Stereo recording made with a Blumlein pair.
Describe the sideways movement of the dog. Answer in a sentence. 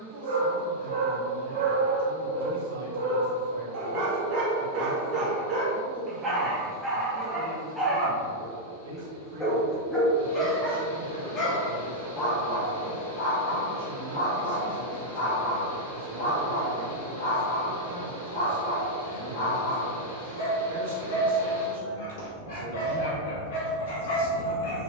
You can hear the dog go from the right side to the left.